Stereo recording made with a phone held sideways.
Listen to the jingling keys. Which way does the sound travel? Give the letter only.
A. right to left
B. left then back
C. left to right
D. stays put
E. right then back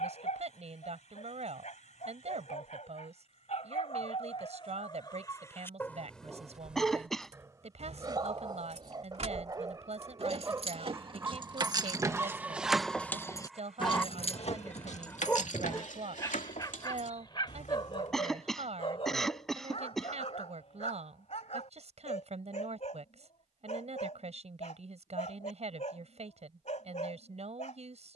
A.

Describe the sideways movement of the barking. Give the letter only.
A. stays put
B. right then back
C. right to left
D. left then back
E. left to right
B.